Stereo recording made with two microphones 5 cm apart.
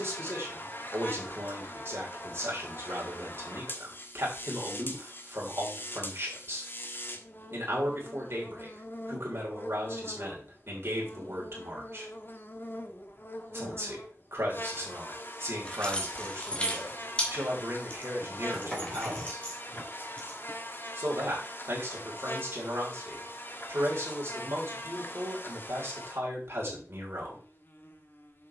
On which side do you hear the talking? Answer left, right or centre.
right.